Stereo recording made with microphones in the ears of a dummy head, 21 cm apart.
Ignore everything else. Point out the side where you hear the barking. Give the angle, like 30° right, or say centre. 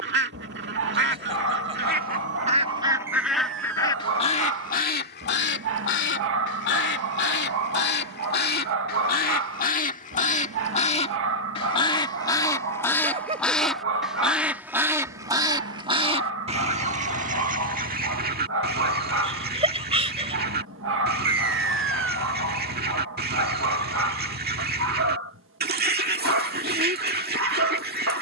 50° right.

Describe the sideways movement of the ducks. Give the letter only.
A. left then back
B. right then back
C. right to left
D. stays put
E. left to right
A.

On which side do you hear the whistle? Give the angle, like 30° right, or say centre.
50° right.